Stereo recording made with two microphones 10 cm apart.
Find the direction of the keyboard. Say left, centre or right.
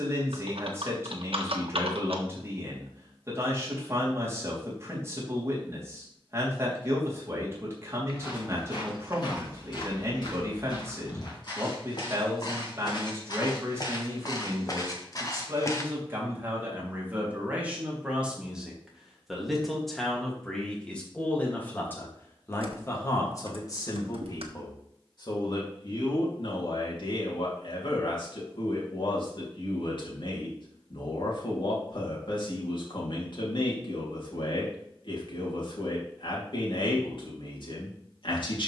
right.